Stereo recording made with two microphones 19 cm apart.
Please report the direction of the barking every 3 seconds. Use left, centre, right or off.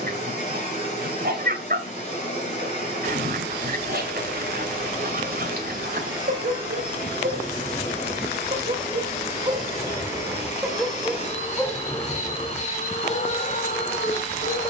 right, right, right, centre, left.